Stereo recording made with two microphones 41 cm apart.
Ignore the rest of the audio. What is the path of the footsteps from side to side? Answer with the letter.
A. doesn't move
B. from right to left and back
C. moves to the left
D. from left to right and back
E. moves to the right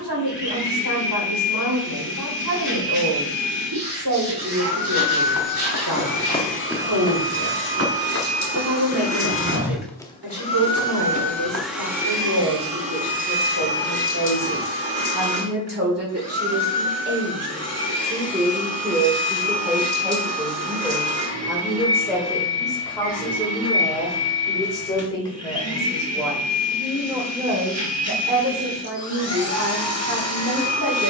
D.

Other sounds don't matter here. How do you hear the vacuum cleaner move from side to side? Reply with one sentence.
You can hear the vacuum cleaner move from left to right.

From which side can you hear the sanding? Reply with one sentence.
In this clip you hear the sanding on the right.